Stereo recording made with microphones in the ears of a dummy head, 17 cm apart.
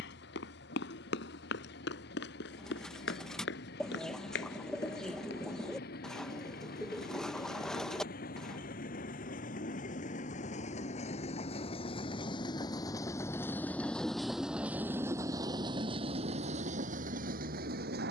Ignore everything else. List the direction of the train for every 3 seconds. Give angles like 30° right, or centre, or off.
60° left, 60° left, 50° left, 40° left, 10° left, 40° right.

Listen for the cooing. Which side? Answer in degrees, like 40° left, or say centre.
centre.